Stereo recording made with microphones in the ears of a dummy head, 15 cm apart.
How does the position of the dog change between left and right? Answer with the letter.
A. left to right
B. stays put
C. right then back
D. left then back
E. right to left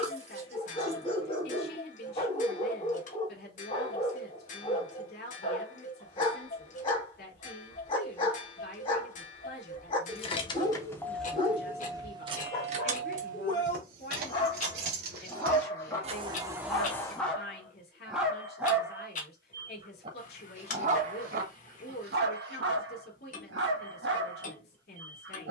A.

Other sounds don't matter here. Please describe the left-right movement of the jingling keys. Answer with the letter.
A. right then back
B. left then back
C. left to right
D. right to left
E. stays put
A.